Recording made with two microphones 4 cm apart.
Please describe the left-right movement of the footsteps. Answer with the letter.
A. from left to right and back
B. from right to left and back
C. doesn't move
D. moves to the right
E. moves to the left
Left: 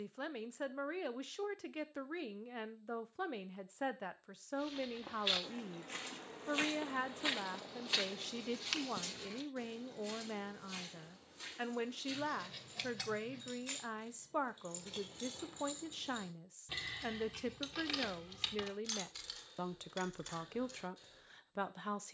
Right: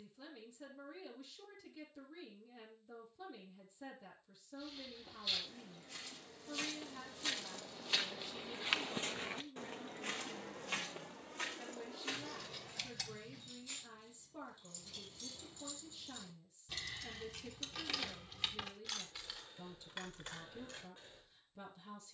D.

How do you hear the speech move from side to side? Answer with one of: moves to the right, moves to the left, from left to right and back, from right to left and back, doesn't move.
doesn't move.